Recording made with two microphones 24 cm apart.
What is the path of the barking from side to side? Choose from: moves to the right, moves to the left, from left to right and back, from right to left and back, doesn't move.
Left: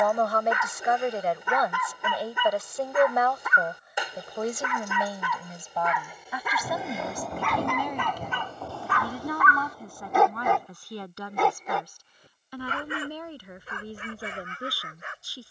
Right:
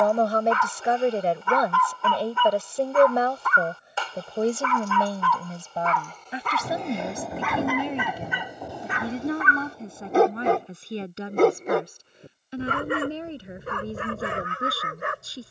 moves to the right.